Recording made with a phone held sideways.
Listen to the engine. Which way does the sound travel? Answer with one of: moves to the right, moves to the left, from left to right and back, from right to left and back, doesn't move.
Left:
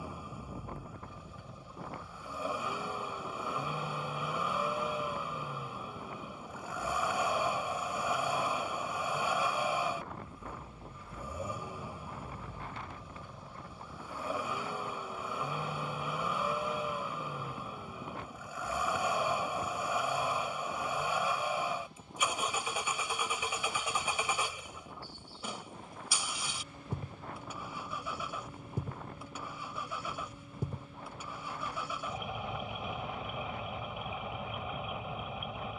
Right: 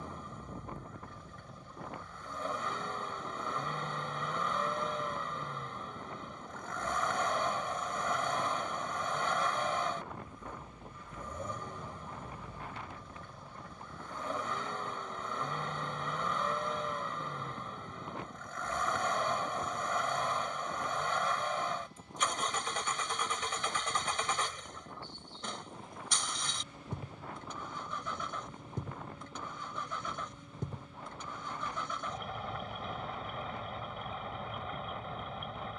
doesn't move.